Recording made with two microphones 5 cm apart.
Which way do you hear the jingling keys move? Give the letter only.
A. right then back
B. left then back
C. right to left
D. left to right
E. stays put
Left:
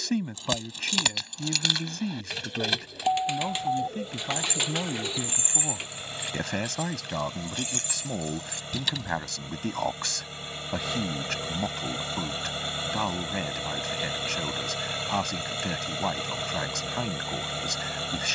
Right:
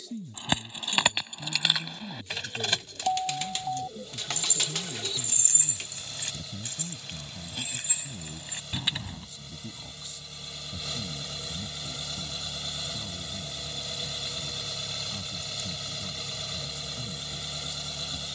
B.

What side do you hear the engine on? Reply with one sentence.
You can hear the engine on the left.